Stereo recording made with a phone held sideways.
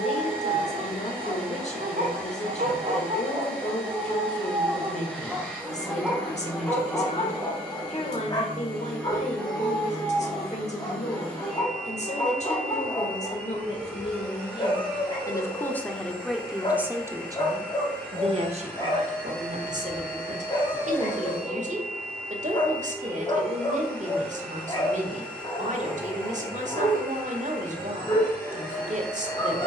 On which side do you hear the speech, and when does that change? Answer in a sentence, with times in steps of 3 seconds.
You can hear the speech on the left from 0 s, in the centre from 15 s and on the right from 18 s.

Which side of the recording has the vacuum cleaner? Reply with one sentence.
In this clip you hear the vacuum cleaner in the centre.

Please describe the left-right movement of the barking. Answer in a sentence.
You can hear the barking move from right to left.